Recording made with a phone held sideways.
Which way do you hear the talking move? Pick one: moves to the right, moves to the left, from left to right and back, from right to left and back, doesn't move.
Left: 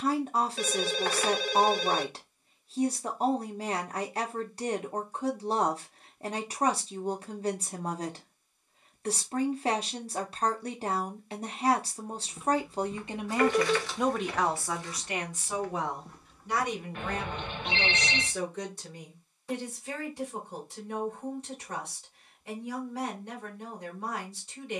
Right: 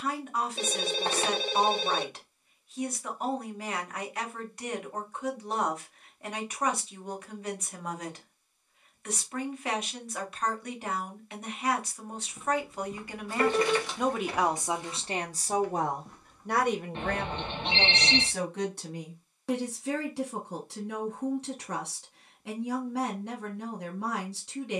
moves to the right.